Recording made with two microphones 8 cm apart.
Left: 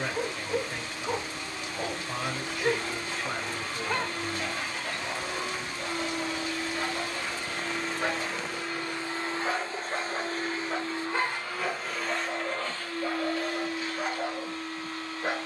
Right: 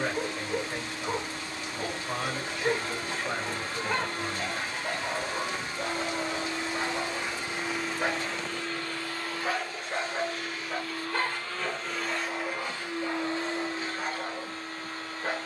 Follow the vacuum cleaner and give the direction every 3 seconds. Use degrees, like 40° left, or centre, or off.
40° right, 40° right, 10° right, 20° left, 30° right.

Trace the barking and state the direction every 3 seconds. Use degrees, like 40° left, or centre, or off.
20° left, 20° right, 30° right, centre, 10° left.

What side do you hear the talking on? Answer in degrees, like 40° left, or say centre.
20° right.